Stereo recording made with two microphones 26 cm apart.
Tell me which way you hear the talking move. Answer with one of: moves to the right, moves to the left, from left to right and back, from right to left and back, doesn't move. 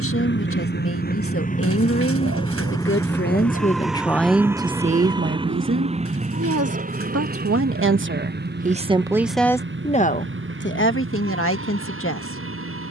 from left to right and back.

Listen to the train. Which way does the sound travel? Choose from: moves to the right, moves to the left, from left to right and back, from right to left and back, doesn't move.
moves to the right.